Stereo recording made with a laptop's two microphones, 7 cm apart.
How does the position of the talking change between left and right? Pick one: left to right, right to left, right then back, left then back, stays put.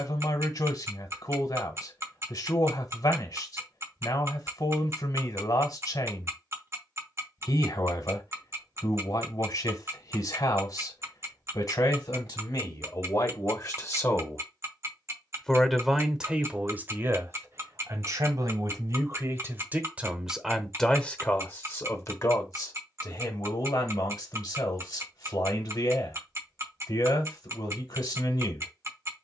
right then back.